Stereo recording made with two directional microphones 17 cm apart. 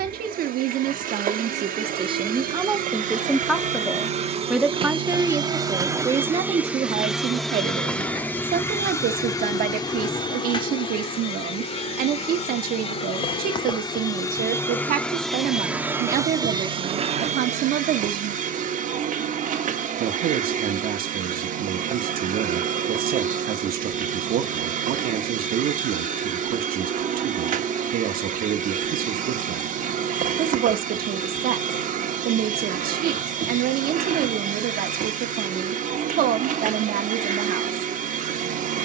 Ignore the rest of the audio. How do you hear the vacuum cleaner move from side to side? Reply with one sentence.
In this clip you hear the vacuum cleaner go left and come back.